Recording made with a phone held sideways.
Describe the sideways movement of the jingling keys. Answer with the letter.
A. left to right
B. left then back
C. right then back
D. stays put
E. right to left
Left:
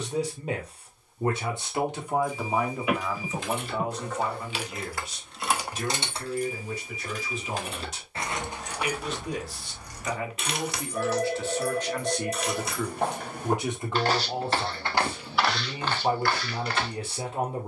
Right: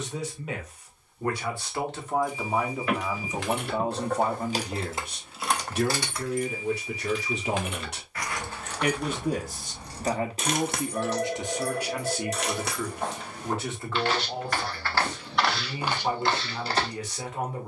B.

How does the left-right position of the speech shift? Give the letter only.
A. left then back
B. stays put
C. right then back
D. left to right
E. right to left
C.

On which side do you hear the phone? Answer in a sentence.
In this clip you hear the phone in the centre.